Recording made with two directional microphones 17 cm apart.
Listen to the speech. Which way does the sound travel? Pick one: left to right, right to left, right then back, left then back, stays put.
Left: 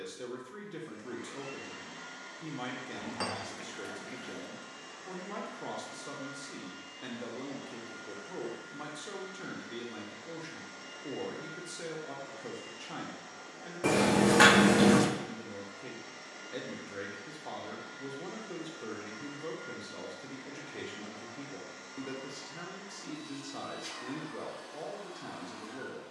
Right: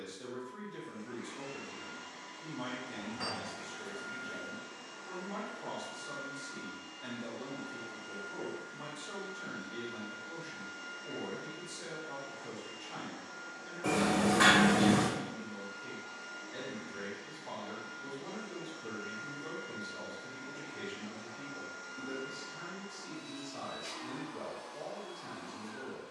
stays put.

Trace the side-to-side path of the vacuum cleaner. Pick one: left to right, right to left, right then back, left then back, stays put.
stays put.